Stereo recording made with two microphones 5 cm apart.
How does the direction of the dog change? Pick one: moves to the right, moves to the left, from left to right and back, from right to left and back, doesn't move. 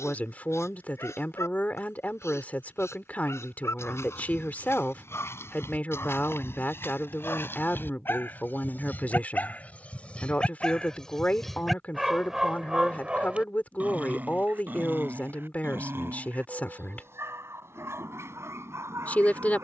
moves to the right.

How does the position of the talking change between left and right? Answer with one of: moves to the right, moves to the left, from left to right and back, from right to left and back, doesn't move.
doesn't move.